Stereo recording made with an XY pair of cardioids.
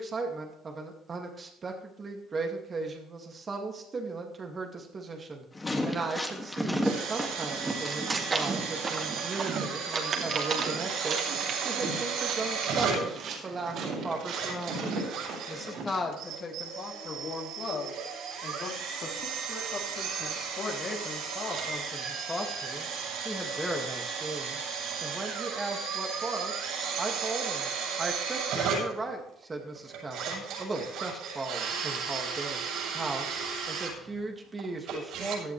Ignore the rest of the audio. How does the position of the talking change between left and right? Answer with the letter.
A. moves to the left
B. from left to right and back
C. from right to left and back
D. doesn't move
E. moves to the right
C.